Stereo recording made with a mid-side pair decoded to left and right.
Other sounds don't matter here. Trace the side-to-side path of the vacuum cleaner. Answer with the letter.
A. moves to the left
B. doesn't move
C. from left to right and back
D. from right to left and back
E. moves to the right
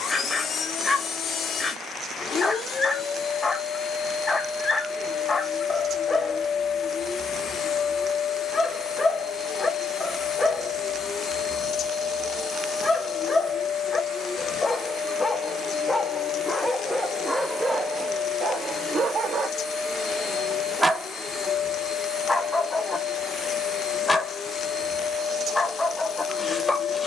B.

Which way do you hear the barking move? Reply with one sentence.
In this clip you hear the barking go right and come back.